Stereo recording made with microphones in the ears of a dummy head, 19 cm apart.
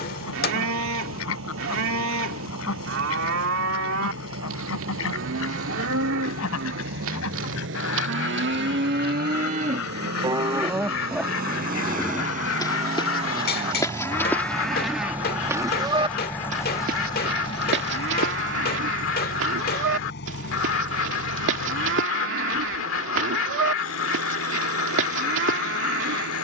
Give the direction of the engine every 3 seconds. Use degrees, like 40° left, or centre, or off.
70° right, 60° right, 60° right, 50° right, 30° right, 10° left, 50° left, 60° left, 70° left.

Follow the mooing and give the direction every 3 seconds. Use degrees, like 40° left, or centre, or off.
70° right, 70° right, 70° right, 20° right, 10° left, 30° right, 70° right, 70° right, 70° right.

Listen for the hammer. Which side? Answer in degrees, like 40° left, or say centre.
50° left.